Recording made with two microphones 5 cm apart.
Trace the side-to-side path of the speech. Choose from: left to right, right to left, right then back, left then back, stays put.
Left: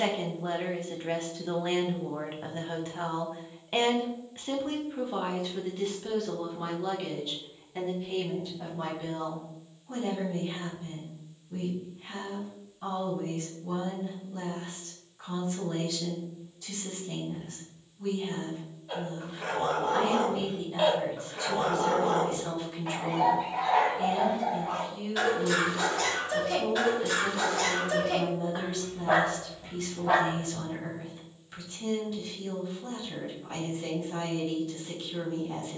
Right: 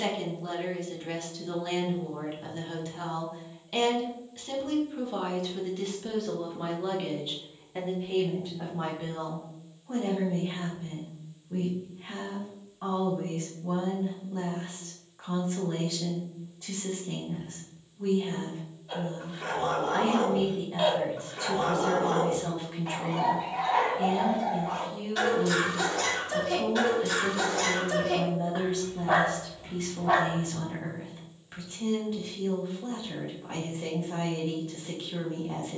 left to right.